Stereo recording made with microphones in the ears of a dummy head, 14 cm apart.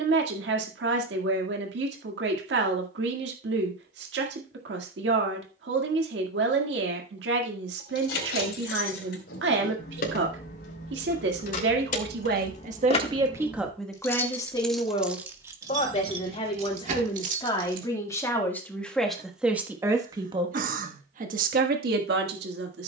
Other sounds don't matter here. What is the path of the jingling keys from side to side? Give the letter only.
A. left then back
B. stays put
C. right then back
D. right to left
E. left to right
E.